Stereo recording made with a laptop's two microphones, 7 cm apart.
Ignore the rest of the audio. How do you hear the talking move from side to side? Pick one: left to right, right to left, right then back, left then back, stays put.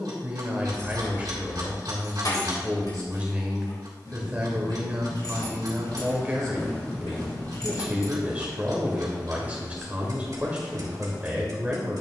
stays put.